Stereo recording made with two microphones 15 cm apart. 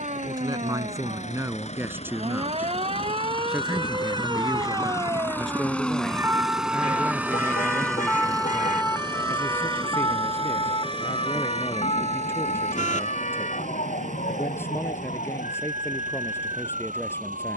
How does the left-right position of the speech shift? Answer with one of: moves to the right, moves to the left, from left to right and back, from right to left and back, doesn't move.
moves to the left.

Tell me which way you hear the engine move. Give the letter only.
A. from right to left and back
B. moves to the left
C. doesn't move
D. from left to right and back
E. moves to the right
E.